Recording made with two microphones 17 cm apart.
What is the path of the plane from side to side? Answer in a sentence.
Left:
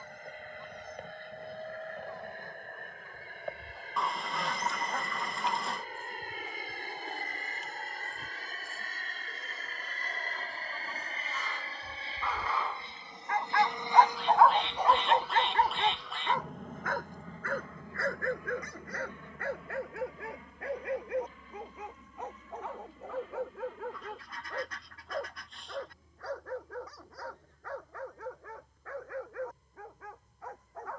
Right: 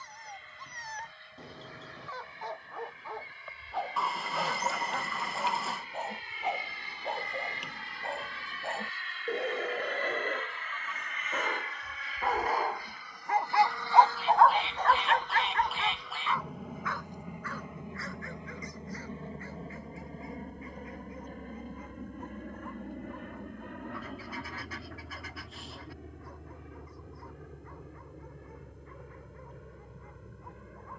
You can hear the plane go from the left side to the right.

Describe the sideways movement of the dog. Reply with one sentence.
In this clip you hear the dog go from the right side to the left.